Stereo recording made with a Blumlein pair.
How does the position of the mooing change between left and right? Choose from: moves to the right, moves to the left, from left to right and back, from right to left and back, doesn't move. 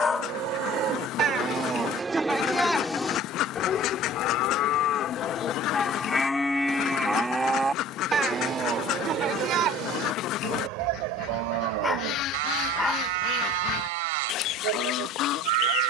from right to left and back.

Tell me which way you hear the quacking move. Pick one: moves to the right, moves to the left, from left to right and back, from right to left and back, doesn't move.
doesn't move.